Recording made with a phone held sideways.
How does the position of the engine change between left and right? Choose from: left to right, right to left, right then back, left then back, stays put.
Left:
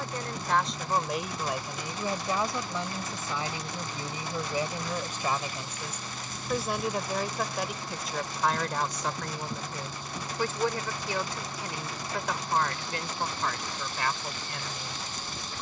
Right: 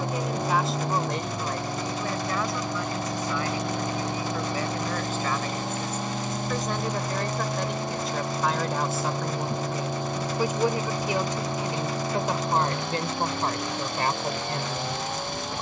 stays put.